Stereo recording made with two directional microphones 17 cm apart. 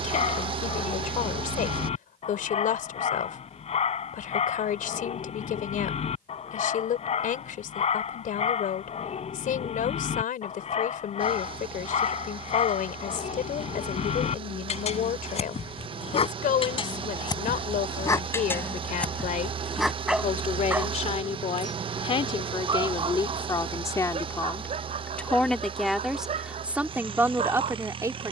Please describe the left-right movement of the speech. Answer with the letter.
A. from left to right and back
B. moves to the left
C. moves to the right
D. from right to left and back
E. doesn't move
C.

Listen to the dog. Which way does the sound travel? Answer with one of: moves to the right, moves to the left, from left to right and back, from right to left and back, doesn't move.
moves to the right.